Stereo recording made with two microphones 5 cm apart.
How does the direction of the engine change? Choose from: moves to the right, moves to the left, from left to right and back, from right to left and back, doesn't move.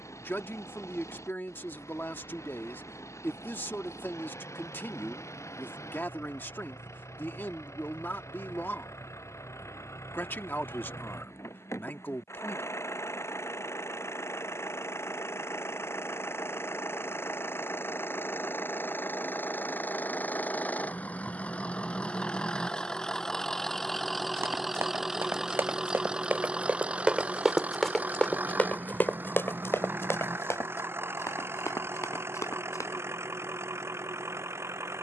moves to the right.